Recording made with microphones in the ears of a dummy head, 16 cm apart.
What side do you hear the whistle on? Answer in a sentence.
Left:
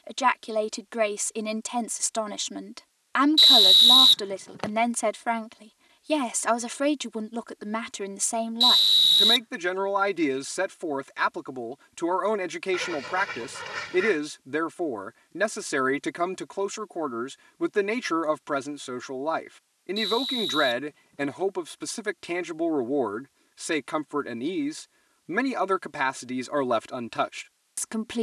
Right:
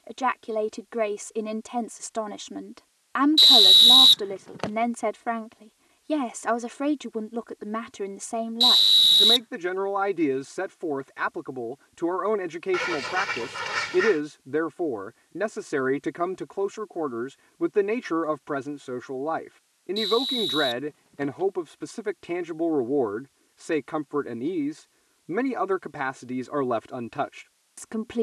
In this clip you hear the whistle in the centre.